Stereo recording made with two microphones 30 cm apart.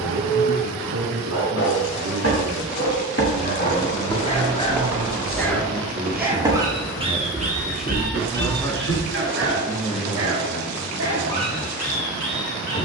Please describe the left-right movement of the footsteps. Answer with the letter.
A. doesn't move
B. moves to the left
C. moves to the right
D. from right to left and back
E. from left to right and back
E.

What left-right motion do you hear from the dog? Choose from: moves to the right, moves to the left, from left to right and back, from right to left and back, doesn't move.
moves to the right.